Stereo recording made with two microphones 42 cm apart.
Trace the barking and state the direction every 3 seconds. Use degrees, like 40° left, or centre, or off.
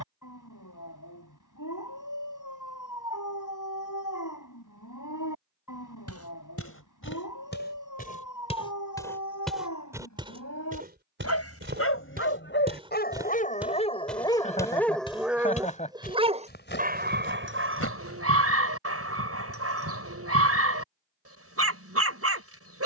50° left, 50° left, 50° left, 40° left, 20° left, 20° right, 30° right, 30° right.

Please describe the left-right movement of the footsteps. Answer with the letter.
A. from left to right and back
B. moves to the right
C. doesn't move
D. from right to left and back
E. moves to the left
A.